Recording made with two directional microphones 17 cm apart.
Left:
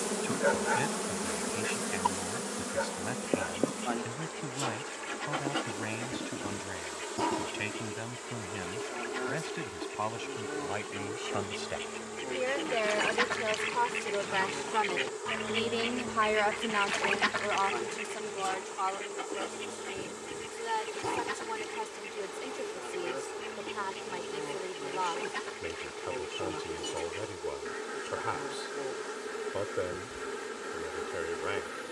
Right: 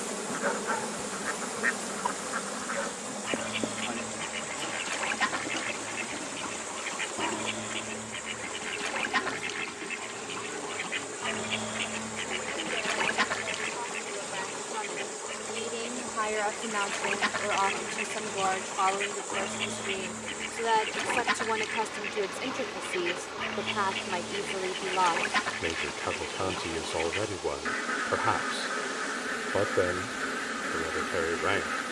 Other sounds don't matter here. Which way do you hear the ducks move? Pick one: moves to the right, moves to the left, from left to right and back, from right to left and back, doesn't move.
from right to left and back.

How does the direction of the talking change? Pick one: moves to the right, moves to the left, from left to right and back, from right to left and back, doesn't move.
moves to the right.